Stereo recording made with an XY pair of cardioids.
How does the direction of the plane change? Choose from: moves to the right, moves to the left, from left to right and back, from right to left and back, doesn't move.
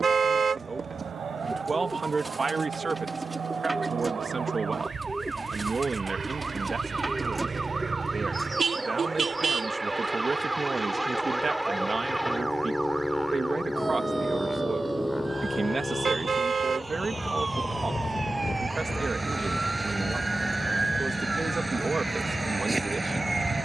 moves to the left.